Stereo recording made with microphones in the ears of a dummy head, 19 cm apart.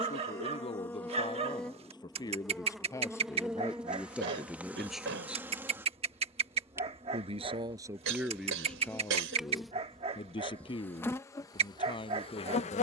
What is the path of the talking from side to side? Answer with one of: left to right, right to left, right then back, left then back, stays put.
right then back.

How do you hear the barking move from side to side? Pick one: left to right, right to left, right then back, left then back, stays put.
stays put.